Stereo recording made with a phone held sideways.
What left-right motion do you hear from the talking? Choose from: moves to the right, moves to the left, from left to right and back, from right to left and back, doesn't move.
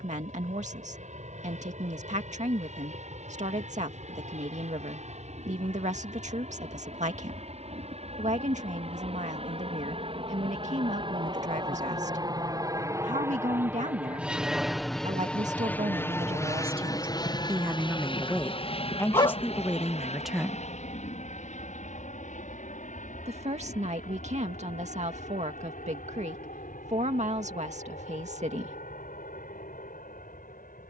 from right to left and back.